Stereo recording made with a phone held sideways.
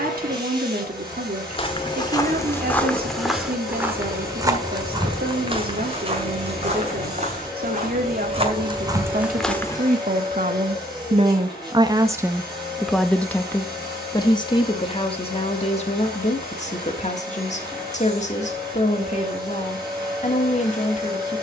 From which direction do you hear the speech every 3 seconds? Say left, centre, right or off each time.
right, right, right, right, centre, left, left.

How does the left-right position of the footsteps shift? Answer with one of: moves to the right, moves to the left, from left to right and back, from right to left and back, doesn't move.
from left to right and back.